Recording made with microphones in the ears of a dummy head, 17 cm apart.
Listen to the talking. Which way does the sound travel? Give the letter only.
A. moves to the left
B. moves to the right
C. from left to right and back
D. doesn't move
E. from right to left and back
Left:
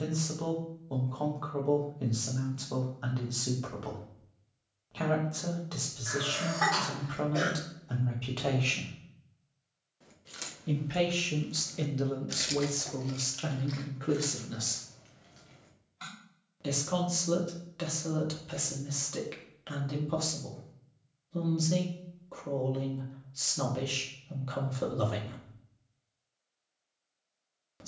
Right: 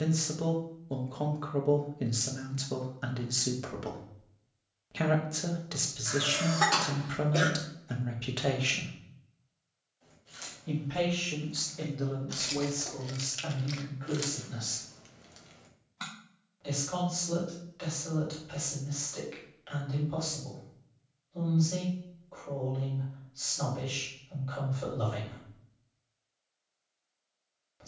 A.